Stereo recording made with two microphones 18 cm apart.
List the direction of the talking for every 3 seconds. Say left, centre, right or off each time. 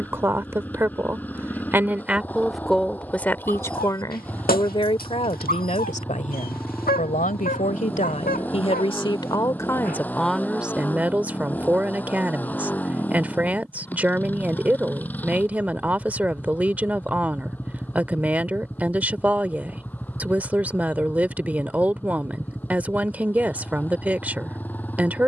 centre, left, left, centre, centre, centre, centre, centre, centre.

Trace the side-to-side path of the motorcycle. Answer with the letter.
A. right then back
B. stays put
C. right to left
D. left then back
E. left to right
B.